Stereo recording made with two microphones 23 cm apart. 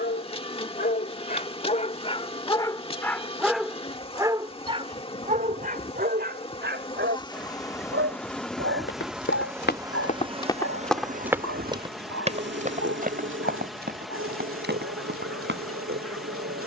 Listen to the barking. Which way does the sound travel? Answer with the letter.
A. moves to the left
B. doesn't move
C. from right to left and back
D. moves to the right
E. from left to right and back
D.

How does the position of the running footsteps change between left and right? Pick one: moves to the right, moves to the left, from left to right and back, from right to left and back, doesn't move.
moves to the right.